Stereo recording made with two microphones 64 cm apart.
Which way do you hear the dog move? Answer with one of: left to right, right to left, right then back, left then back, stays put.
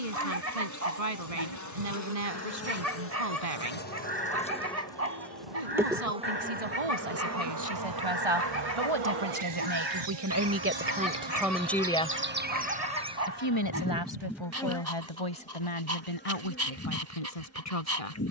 stays put.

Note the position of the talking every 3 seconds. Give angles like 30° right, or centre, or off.
70° right, 70° right, 60° right, 20° right, 40° left, 60° left.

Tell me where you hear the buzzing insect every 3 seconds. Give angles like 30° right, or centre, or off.
30° left, 10° left, 30° right, 40° right, 10° right, 20° left.